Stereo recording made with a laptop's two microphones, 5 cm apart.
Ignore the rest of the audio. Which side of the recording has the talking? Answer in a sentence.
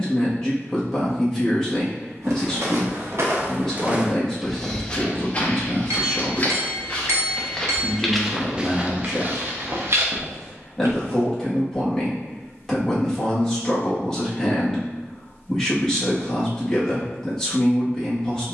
In this clip you hear the talking in the centre.